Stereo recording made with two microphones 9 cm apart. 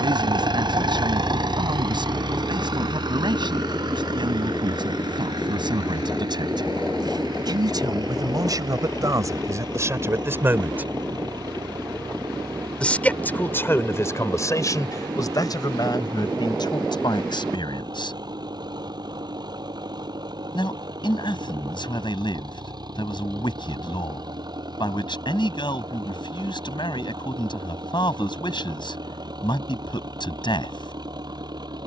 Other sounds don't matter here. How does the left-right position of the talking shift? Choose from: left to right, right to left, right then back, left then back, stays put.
right to left.